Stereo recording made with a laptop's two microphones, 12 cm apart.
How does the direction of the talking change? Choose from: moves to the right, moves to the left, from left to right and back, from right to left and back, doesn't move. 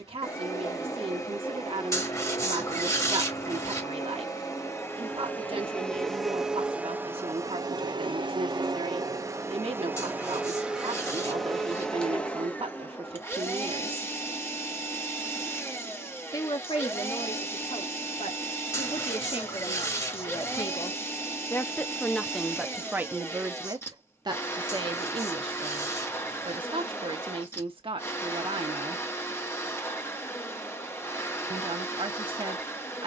from right to left and back.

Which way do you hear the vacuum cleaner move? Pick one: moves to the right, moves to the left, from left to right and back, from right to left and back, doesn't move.
from left to right and back.